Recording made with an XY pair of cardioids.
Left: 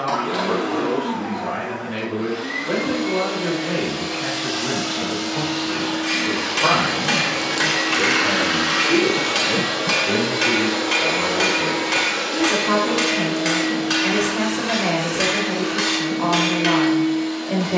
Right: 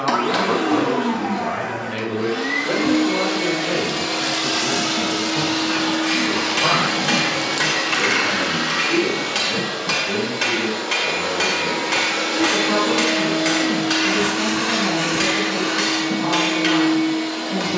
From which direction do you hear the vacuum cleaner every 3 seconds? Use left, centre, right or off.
right, right, centre, left, right, right.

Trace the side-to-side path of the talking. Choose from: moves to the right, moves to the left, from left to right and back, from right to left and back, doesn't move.
moves to the left.